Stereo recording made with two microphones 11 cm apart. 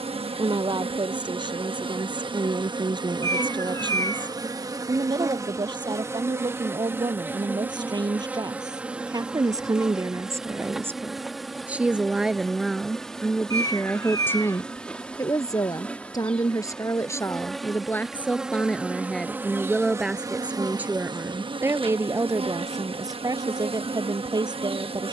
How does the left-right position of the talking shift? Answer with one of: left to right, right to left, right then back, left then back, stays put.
left then back.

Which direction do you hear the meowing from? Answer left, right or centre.
left.